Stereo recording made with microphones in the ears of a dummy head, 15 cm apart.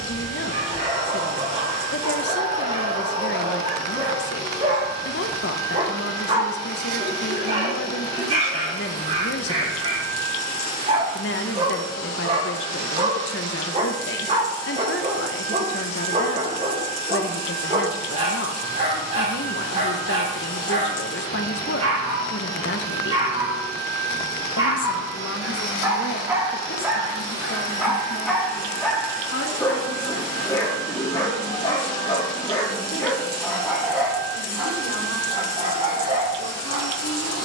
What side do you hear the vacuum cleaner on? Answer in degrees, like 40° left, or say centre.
20° left.